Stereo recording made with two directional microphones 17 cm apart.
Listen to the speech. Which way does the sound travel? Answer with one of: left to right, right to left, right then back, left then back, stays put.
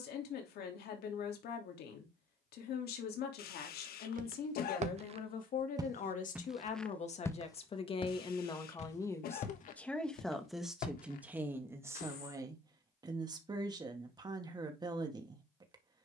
left to right.